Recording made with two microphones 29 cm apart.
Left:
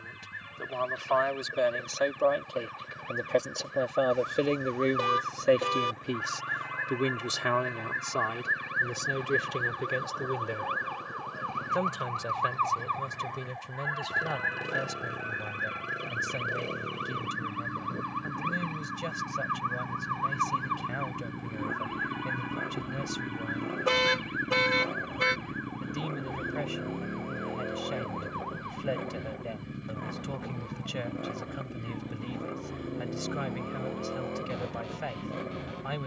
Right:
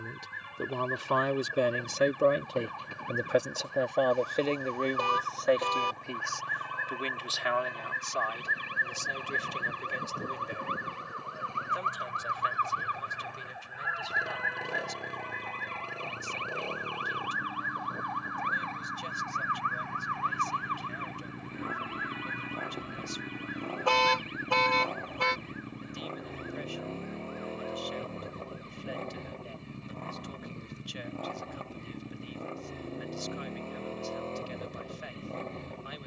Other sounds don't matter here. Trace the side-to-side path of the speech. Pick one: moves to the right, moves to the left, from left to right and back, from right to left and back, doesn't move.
moves to the left.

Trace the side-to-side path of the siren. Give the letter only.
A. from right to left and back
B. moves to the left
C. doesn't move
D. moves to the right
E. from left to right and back
B.